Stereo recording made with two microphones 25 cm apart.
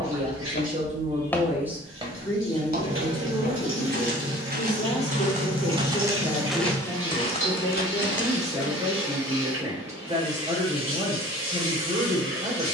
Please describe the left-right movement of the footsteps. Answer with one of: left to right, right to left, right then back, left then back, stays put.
right then back.